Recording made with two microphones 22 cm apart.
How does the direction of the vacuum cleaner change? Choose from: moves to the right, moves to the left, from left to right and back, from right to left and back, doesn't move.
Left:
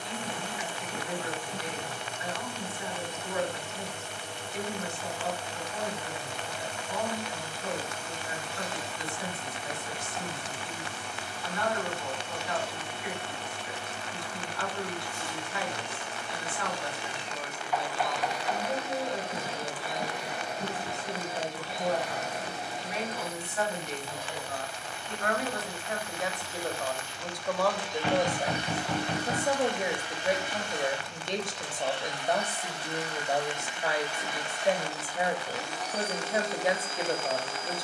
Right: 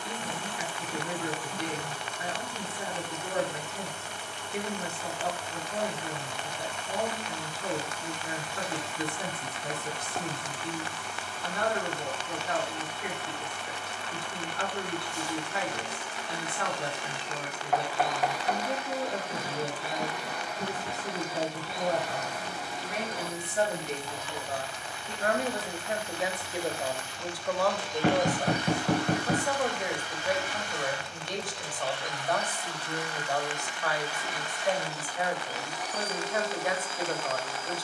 doesn't move.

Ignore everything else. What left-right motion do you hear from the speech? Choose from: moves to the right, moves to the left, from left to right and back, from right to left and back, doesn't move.
moves to the left.